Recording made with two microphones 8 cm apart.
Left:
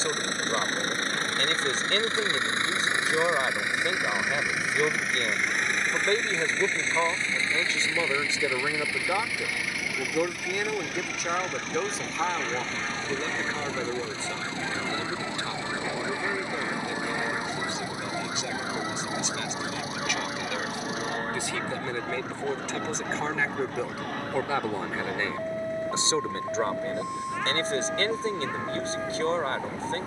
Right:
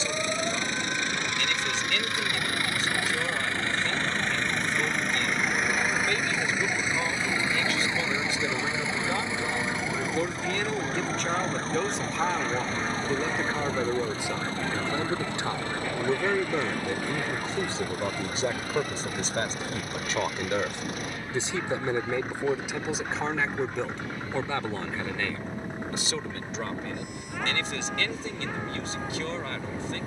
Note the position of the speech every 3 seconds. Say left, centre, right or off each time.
left, left, left, centre, centre, right, right, centre, left, left.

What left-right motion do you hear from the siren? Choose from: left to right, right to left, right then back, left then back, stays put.
right to left.